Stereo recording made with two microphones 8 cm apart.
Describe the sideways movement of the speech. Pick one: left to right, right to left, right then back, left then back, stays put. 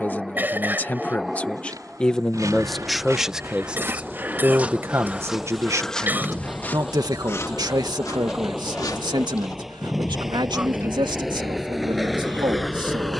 left to right.